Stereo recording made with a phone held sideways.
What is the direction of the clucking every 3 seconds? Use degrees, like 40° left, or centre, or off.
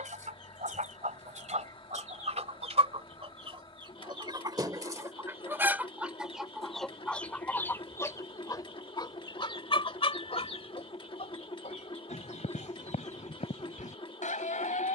50° right, 30° right, 10° left, 40° left, 60° left.